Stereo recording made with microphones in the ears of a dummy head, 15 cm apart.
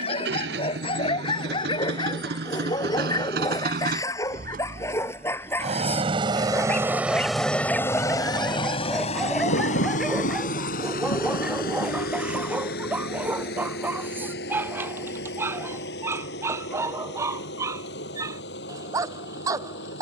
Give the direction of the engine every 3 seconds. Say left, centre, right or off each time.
right, right, centre, left, left, left, left.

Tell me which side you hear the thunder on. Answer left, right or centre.
left.